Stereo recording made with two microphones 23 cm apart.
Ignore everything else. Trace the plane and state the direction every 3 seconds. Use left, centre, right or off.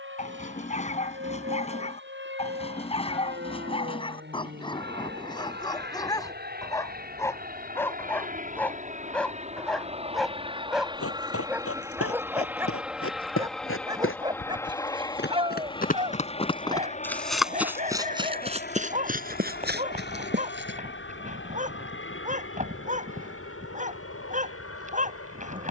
right, right, right, right, centre, left, left, left, left.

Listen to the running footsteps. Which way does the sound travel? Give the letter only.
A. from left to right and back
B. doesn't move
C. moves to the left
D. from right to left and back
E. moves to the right
E.